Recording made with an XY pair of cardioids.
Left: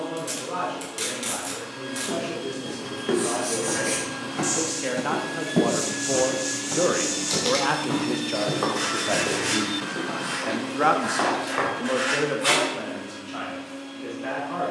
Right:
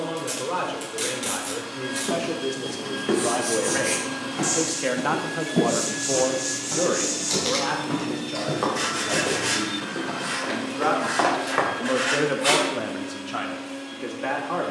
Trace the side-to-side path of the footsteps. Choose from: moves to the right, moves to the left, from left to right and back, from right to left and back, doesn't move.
from right to left and back.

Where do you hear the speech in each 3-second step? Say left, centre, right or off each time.
right, right, left, left, right.